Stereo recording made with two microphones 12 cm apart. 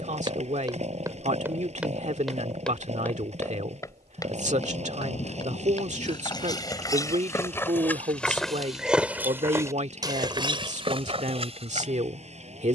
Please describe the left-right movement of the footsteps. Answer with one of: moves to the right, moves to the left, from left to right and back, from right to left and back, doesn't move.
from right to left and back.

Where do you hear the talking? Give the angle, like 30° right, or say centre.
80° right.